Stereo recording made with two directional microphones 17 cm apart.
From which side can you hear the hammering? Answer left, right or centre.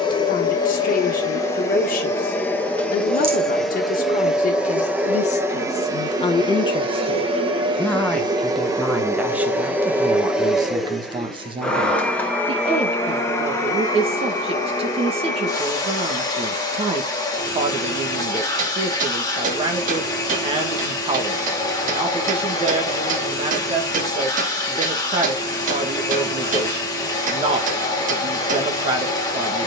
right.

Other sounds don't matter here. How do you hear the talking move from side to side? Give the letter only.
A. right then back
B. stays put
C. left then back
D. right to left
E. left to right
E.